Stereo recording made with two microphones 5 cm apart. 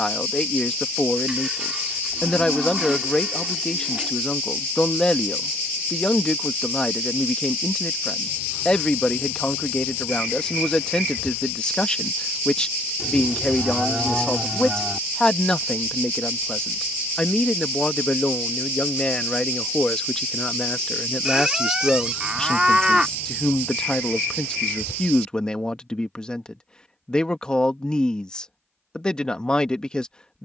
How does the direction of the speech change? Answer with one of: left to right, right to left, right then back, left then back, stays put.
stays put.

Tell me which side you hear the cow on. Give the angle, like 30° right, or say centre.
20° right.